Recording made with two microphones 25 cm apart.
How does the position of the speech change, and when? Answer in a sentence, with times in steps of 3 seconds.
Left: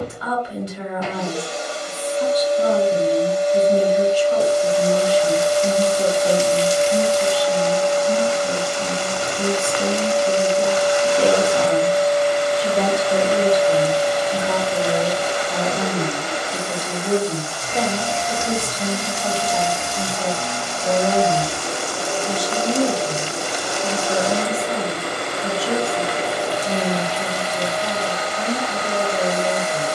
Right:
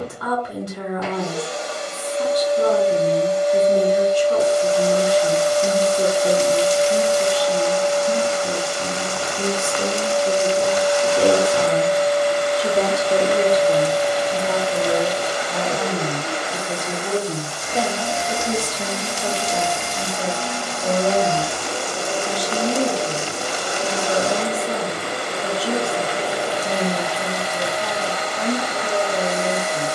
In this clip you hear the speech on the right from 0 s, in the centre from 12 s and on the right from 18 s.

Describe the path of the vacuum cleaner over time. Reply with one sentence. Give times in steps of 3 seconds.
In this clip you hear the vacuum cleaner on the left from 0 s, in the centre from 12 s, on the right from 15 s, in the centre from 18 s and on the left from 21 s.